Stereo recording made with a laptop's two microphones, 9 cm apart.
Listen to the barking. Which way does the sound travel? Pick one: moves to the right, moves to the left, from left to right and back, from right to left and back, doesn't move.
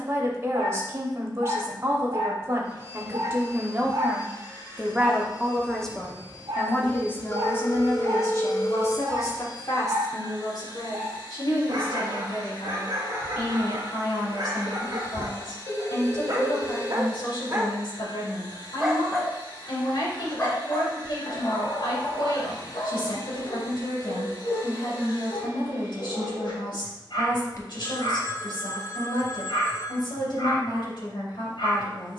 moves to the left.